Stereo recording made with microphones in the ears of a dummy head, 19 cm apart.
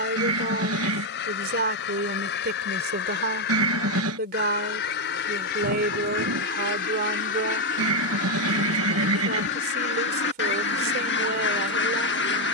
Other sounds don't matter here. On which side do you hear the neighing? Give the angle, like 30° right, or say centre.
70° right.